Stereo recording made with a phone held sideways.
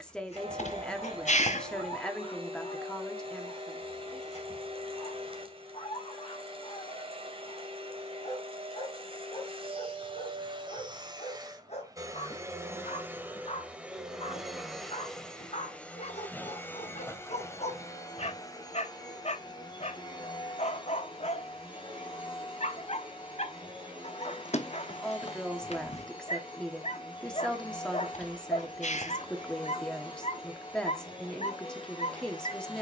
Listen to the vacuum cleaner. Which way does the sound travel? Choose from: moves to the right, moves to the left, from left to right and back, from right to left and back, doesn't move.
moves to the left.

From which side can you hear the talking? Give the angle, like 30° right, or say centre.
10° left.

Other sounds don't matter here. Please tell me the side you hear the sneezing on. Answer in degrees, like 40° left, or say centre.
60° left.